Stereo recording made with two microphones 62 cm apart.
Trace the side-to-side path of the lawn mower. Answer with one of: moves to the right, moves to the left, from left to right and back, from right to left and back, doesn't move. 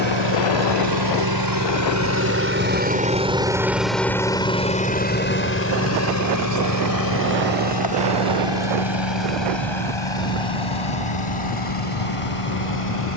moves to the left.